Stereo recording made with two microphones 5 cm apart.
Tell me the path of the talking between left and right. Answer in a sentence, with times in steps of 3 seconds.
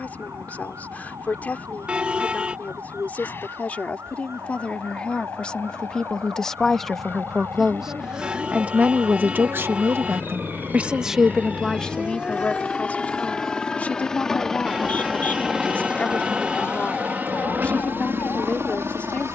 In this clip you hear the talking on the left from 0 s, in the centre from 6 s, on the right from 9 s and on the left from 12 s.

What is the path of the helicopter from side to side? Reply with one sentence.
In this clip you hear the helicopter go from the left side to the right.